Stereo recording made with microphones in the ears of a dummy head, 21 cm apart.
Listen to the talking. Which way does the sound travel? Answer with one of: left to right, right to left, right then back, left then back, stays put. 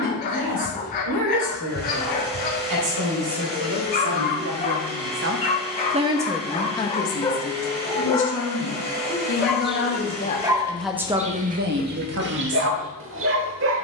left then back.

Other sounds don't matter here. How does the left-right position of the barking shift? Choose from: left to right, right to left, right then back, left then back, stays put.
left to right.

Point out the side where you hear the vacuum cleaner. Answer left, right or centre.
right.